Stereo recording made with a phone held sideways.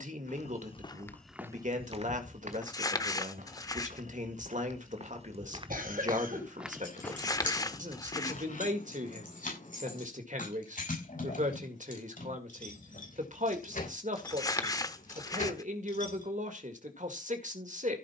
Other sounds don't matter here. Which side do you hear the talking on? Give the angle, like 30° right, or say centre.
70° right.